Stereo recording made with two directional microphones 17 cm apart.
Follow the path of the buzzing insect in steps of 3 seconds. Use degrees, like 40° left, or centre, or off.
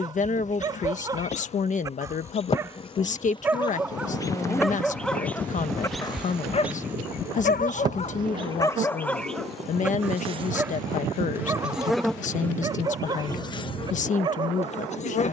40° left, 20° left, 20° right, 20° right, 30° left.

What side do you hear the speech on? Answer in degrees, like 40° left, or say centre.
40° left.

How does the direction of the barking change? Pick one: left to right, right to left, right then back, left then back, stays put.
left then back.